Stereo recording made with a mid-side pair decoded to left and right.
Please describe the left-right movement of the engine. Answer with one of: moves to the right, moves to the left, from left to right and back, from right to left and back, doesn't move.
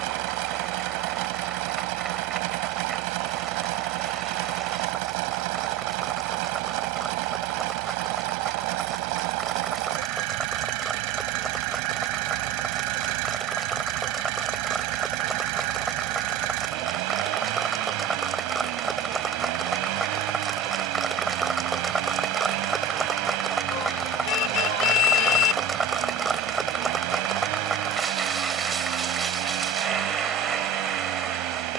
doesn't move.